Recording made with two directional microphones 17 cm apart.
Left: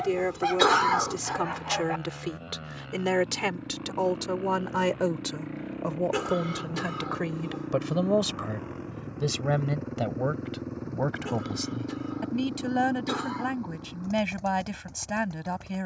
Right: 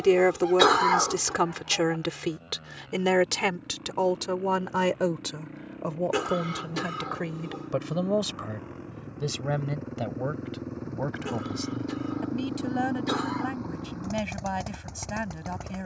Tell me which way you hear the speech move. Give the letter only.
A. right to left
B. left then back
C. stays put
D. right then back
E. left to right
A.